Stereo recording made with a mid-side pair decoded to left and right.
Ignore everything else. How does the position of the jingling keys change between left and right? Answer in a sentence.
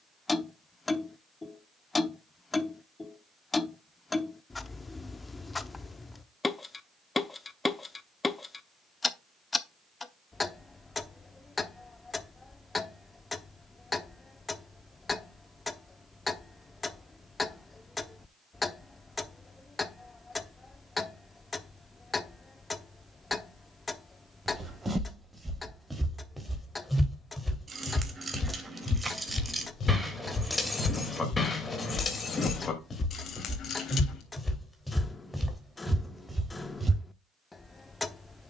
You can hear the jingling keys travel towards the left.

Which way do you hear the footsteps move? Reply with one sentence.
You can hear the footsteps go left and come back.